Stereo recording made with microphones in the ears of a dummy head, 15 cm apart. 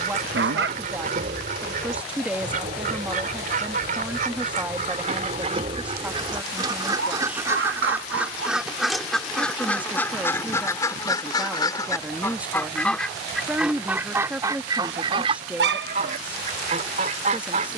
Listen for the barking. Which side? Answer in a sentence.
You can hear the barking on the right.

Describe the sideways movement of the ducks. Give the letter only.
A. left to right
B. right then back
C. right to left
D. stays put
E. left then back
E.